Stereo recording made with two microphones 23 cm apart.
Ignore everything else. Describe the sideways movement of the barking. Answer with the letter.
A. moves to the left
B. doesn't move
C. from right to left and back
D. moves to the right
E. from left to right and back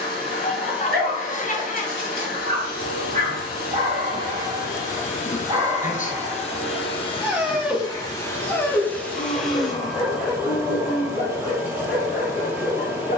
A.